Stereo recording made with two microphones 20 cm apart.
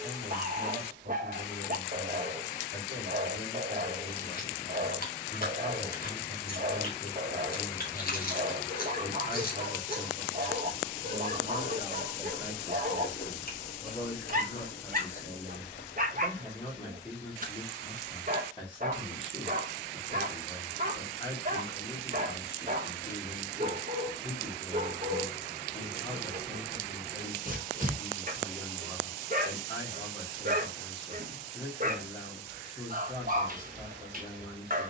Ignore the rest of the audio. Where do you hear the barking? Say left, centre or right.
right.